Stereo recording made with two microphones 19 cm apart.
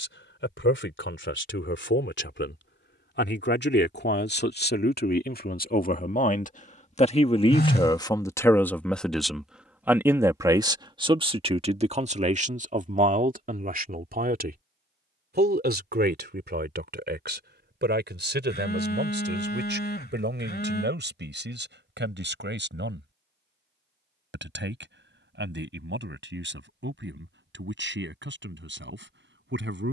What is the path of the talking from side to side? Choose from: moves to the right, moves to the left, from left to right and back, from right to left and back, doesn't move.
moves to the right.